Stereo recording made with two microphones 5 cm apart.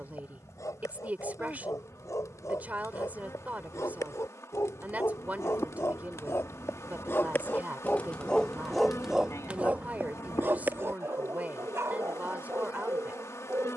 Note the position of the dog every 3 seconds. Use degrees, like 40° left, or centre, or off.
80° left, 70° left, 30° left, 40° right, 60° right.